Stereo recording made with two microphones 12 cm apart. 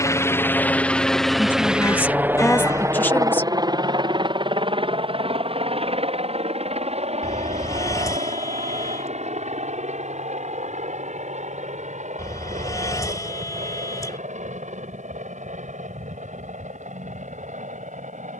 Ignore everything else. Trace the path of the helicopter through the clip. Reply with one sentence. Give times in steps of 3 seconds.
In this clip you hear the helicopter in the centre from 0 s and on the right from 3 s.